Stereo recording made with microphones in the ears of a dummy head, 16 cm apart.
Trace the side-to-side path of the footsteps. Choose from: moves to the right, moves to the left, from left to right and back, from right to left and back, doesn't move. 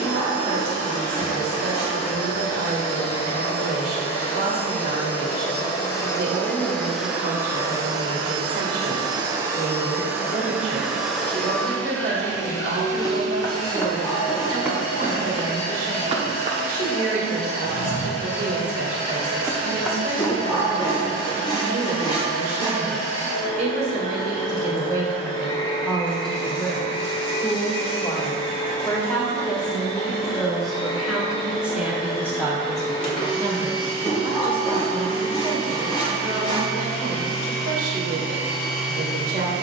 from left to right and back.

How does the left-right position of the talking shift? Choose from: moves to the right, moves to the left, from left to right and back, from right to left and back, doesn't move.
from right to left and back.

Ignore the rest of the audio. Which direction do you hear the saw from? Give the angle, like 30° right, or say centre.
30° left.